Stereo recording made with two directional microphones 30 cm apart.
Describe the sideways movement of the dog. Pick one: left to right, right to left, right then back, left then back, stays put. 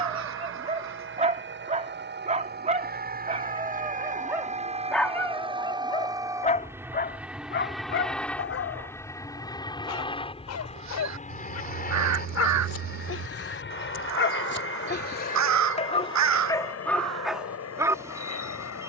left then back.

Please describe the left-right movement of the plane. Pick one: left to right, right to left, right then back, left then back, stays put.
right to left.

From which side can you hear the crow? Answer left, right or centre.
right.